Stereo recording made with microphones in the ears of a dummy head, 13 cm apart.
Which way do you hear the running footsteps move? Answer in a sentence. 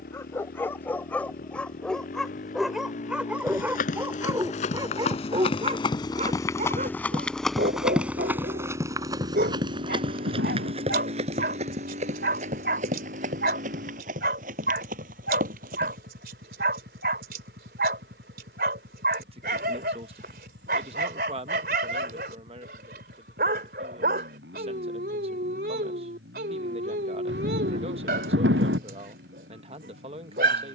You can hear the running footsteps move from left to right.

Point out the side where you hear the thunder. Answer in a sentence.
You can hear the thunder on the right.